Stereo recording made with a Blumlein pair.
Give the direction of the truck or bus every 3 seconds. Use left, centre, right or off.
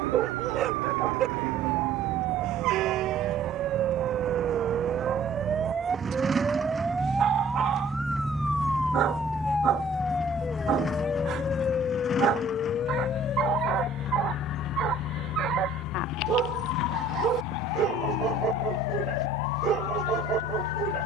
right, right, centre, centre, left, left, left.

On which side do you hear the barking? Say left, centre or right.
right.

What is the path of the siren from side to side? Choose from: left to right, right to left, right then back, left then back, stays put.
right to left.